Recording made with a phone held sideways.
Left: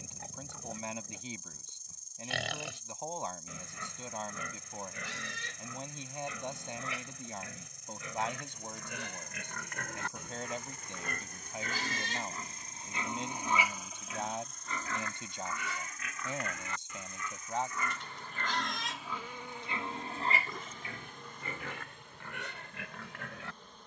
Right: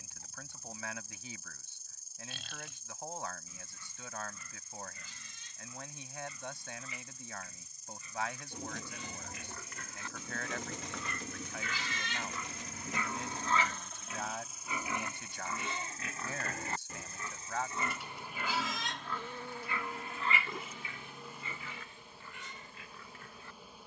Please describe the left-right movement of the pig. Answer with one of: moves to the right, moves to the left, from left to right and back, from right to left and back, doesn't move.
from left to right and back.